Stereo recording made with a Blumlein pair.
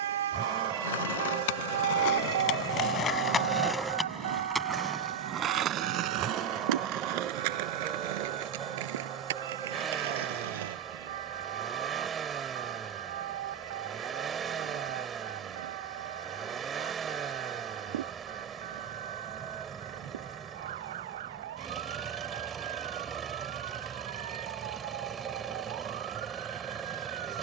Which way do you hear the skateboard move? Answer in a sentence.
In this clip you hear the skateboard travel towards the right.